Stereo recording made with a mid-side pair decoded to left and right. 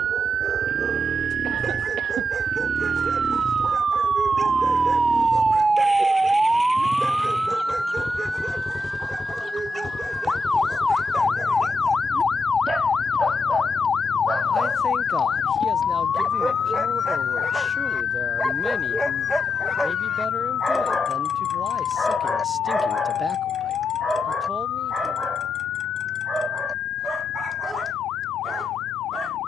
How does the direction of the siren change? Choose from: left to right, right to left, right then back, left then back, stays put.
right to left.